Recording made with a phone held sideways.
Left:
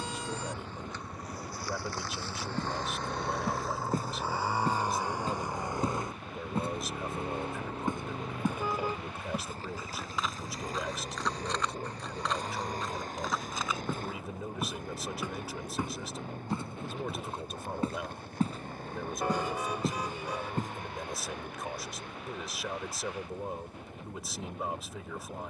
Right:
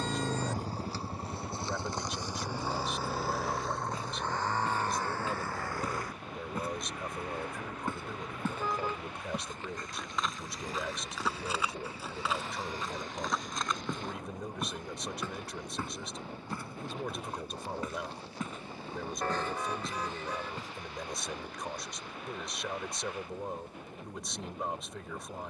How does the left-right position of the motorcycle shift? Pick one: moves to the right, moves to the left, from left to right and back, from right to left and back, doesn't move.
moves to the left.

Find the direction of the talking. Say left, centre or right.
centre.